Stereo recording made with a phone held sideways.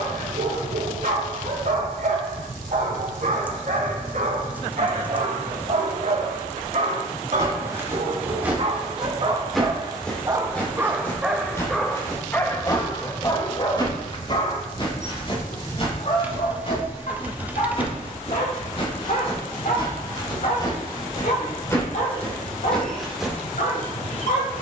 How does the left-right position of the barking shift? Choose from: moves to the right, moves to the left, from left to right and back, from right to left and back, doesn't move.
moves to the left.